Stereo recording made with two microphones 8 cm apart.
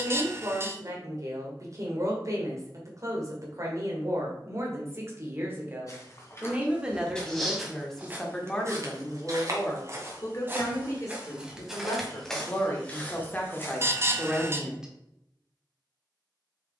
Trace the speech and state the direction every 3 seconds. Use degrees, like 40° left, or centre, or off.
40° right, 40° right, centre, 40° left, 20° left, off.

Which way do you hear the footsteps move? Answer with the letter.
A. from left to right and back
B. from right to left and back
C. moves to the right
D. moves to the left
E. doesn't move
A.